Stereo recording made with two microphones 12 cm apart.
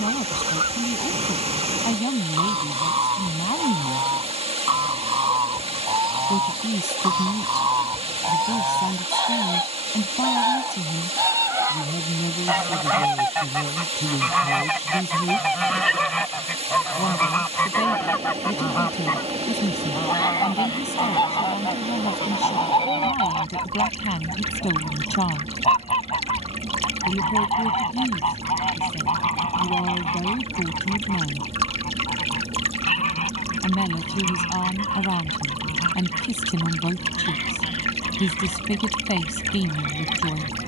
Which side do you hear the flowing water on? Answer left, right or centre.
right.